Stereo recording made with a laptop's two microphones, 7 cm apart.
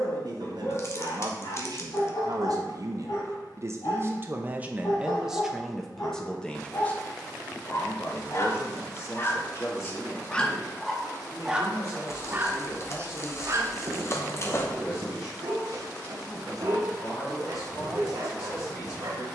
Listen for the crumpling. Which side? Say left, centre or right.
left.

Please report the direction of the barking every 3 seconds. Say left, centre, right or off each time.
left, left, left, centre, right, right, right.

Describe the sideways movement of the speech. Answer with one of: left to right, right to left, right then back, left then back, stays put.
right to left.